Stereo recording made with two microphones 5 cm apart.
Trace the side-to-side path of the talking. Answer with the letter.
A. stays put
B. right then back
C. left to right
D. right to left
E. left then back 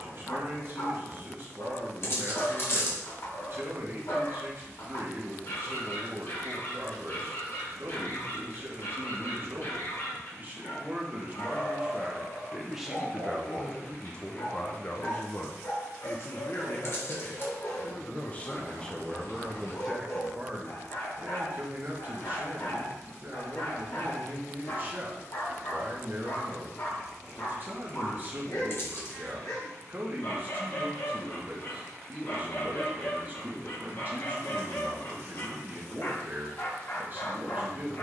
E.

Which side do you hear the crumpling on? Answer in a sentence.
You can hear the crumpling on the left.